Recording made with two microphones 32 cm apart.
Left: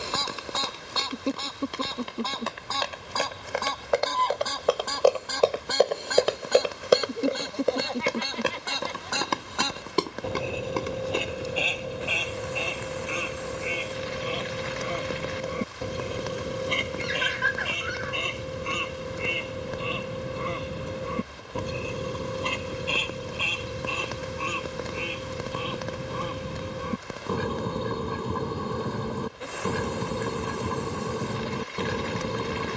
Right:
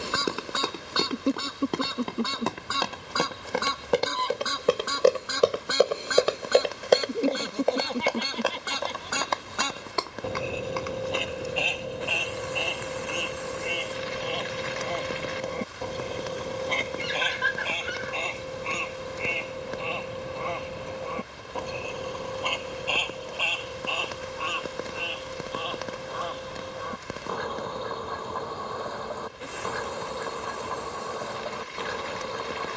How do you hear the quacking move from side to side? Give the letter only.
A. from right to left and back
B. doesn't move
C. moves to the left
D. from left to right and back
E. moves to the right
C.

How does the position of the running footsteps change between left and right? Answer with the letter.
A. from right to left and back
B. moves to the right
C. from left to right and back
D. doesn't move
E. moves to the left
E.